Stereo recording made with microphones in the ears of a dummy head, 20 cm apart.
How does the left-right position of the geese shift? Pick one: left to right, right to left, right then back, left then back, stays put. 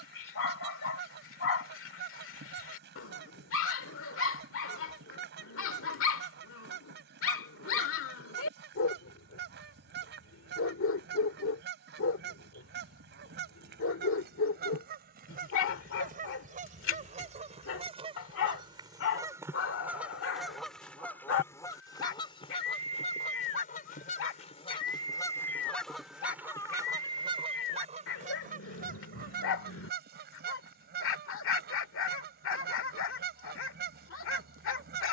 left then back.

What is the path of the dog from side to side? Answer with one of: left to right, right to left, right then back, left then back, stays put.
stays put.